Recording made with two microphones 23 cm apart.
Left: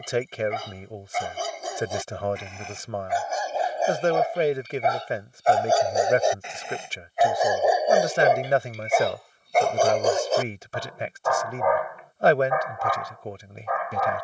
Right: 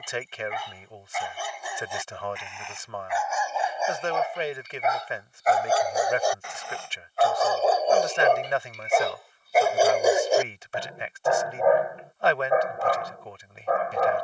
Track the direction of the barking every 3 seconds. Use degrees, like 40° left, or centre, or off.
40° left, 30° left, 10° left, 20° right, 40° right.